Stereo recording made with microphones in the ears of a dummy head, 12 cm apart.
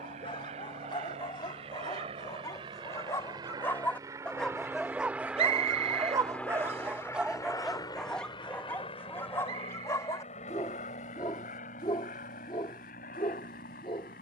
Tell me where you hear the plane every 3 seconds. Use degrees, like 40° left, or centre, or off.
50° right, 20° right, 20° left, 50° left, 60° left.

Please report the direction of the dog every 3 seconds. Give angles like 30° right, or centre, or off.
30° left, centre, centre, 20° left, 40° left.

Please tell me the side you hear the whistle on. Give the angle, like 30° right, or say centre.
40° right.